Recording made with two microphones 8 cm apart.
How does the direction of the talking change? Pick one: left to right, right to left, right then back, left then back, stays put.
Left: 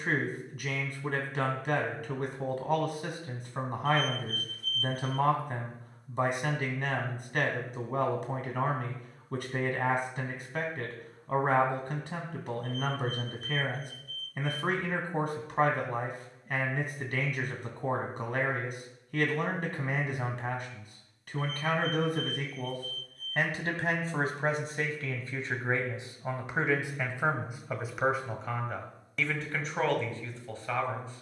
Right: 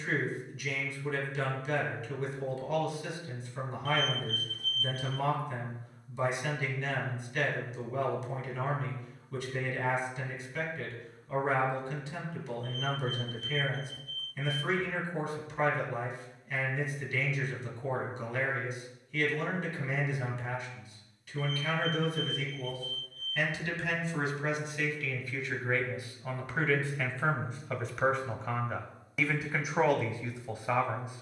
left to right.